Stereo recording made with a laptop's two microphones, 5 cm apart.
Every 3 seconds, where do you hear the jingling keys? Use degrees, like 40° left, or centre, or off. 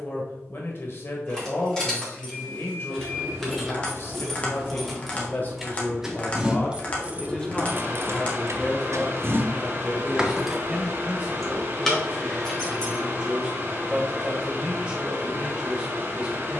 10° left, centre, 30° right, 20° right, 10° left, off.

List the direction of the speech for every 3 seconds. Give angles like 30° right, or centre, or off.
50° left, 40° left, 20° left, 10° right, 20° right, 20° right.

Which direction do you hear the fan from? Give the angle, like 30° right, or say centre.
40° right.